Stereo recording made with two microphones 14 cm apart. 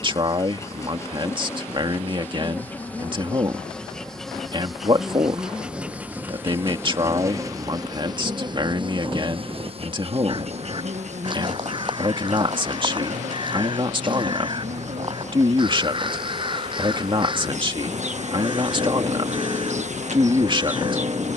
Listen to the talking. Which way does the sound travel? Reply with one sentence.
In this clip you hear the talking stay put.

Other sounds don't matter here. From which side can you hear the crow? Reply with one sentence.
You can hear the crow on the right.